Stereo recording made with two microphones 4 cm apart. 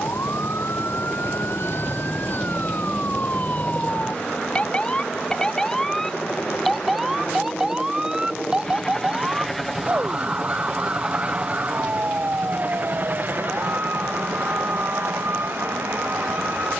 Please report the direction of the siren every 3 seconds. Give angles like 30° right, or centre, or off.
50° left, 20° left, 10° right, 30° right, 40° right, 50° right.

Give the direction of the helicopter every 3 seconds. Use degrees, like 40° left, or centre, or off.
60° left, 50° left, 30° left, 10° right, 40° right, 60° right.